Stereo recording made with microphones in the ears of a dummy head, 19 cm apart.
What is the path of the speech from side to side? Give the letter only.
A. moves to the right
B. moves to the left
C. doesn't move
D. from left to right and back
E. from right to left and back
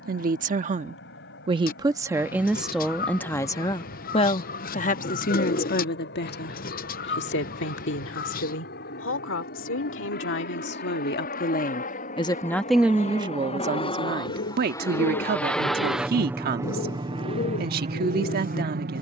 E.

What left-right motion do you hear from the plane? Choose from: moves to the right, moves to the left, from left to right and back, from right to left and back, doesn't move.
moves to the right.